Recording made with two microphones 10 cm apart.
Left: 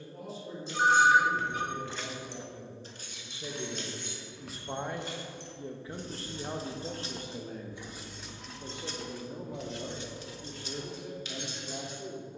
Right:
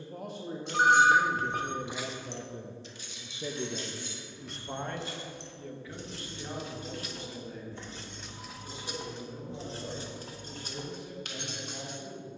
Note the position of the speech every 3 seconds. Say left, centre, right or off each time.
right, centre, left, left.